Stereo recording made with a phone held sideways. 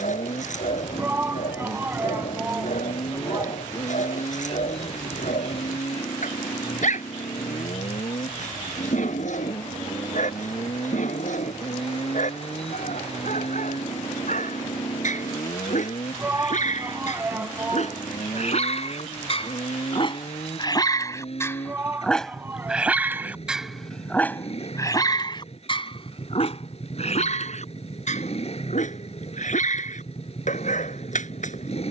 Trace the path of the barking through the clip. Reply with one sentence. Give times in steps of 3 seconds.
You can hear the barking on the left from 0 s, in the centre from 21 s and on the left from 24 s.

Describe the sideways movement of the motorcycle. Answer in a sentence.
You can hear the motorcycle stay put.